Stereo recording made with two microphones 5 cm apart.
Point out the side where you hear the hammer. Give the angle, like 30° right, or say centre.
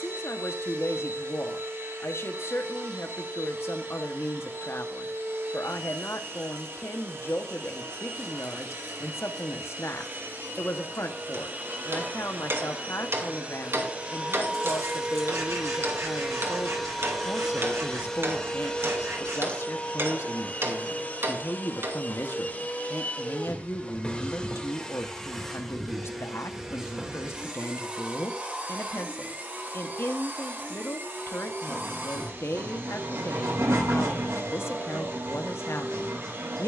60° right.